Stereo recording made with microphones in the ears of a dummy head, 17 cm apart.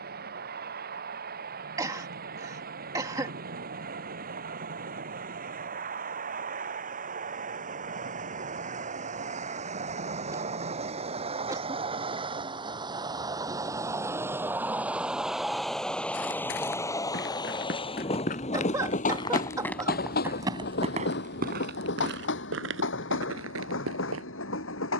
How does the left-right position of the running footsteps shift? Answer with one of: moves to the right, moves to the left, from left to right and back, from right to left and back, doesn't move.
moves to the right.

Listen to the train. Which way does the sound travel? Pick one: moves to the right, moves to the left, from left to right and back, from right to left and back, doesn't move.
moves to the left.